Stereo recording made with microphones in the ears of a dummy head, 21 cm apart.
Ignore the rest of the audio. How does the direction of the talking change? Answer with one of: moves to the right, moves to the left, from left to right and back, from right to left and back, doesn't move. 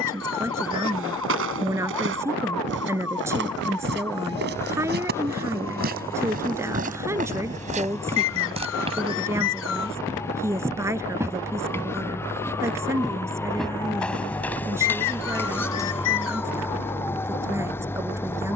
doesn't move.